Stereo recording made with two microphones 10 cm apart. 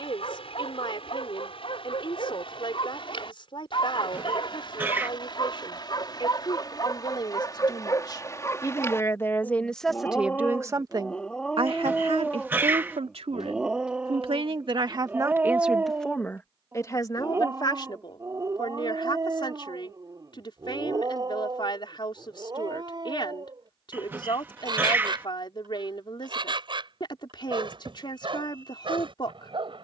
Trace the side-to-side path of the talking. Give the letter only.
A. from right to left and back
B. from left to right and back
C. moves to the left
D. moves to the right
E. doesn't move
B.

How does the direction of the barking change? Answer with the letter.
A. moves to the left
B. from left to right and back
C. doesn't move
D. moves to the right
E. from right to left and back
D.